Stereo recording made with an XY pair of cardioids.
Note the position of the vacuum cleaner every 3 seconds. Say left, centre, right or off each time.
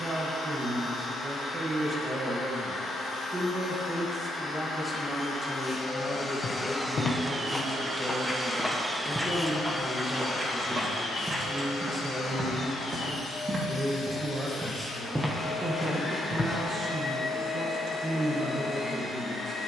left, left, centre, left, left, left, left.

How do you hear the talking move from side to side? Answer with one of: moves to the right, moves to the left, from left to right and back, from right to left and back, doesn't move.
from right to left and back.